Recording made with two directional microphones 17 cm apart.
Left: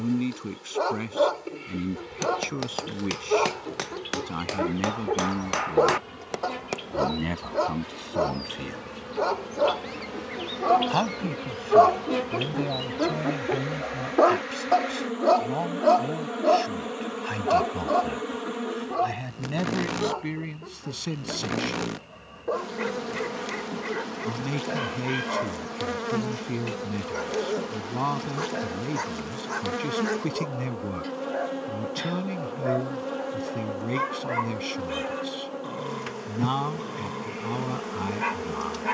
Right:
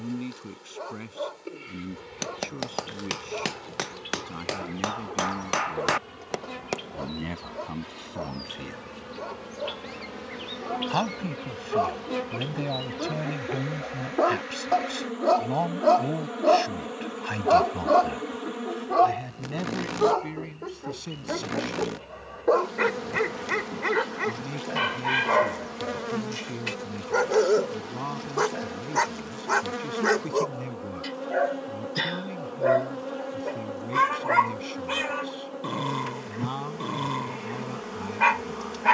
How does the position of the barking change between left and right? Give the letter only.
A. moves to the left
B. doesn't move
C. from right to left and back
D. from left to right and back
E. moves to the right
E.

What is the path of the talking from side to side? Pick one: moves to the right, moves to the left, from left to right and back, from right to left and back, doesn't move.
from left to right and back.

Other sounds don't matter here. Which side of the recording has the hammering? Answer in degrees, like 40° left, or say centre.
10° right.